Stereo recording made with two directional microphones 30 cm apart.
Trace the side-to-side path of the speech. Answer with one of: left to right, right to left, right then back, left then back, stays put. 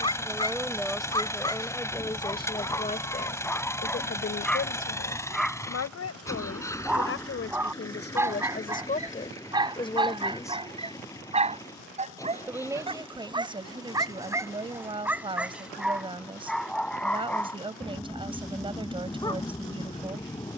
left then back.